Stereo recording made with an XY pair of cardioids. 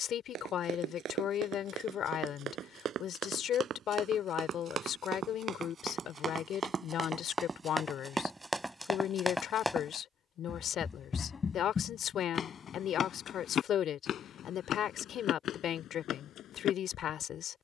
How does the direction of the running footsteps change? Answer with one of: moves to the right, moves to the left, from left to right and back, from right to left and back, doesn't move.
moves to the left.